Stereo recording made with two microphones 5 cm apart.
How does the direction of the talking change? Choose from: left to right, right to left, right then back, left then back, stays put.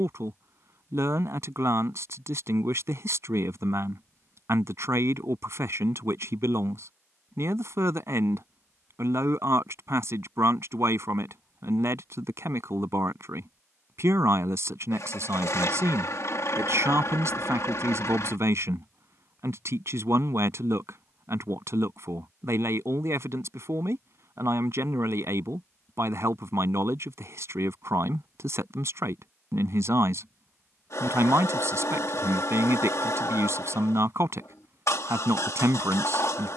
stays put.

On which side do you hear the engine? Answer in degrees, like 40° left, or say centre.
70° left.